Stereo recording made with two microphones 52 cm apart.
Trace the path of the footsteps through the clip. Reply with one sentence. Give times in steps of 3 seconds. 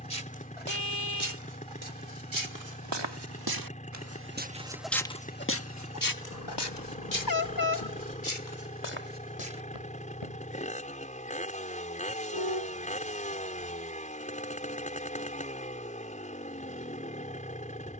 In this clip you hear the footsteps on the right from 0 s, in the centre from 3 s, on the left from 6 s and not at all from 12 s.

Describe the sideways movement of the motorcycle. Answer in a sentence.
You can hear the motorcycle stay put.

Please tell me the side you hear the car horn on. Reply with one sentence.
In this clip you hear the car horn on the left.